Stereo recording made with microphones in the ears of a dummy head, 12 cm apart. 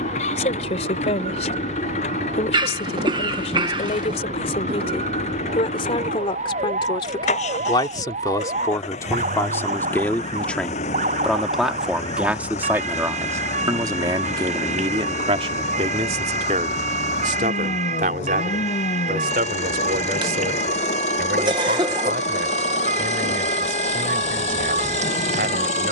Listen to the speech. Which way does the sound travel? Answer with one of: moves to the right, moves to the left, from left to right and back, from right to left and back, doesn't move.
moves to the right.